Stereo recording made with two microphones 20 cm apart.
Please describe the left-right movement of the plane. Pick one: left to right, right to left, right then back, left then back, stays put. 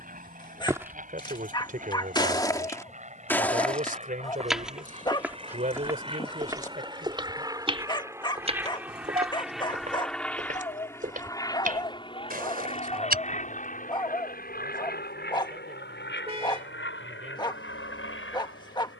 right to left.